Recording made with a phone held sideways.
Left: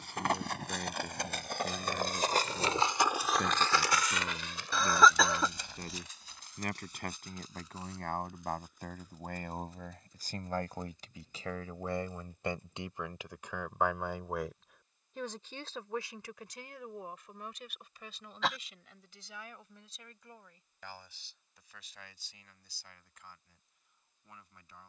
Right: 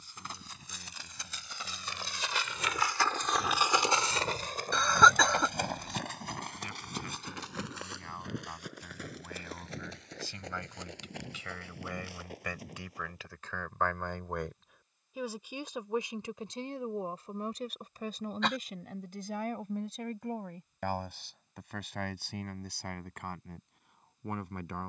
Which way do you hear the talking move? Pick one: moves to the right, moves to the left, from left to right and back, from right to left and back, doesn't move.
moves to the right.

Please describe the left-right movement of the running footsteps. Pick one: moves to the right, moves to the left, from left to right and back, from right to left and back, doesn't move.
moves to the right.